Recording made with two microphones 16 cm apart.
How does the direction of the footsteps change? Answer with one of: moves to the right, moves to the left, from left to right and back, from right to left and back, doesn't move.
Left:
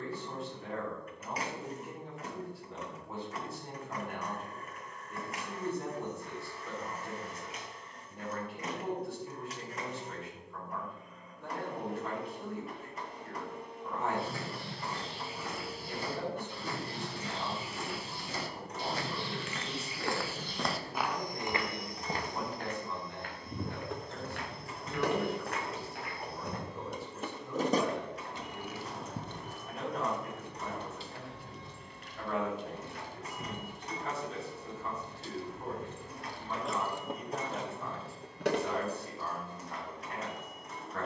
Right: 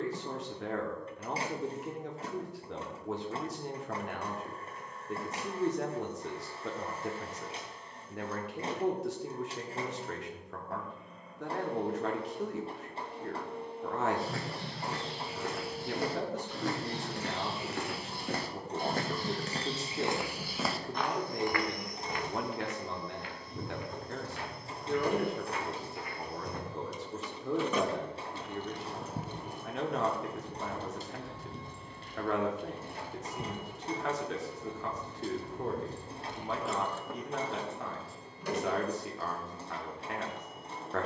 moves to the left.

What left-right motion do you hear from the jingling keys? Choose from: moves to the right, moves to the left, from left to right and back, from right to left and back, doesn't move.
from left to right and back.